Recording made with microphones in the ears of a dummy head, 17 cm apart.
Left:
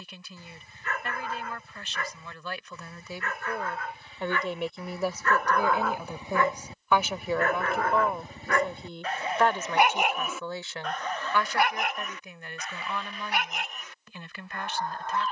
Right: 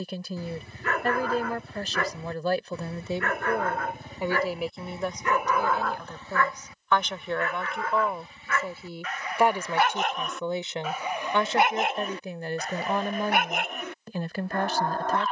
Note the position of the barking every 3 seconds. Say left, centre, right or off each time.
right, right, left, centre, right.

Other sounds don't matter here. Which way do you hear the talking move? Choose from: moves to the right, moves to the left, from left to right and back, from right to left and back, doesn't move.
from right to left and back.